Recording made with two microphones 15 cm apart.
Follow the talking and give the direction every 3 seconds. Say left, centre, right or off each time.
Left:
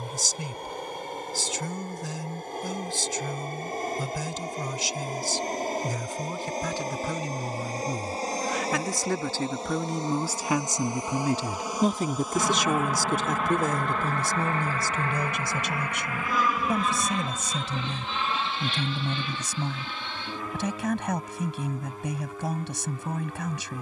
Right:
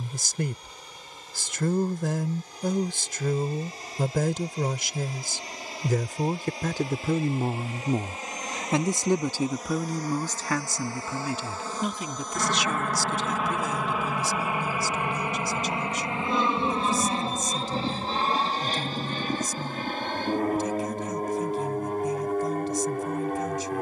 right, right, right, centre, left, left, left, left.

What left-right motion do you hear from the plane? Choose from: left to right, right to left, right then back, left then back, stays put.
left to right.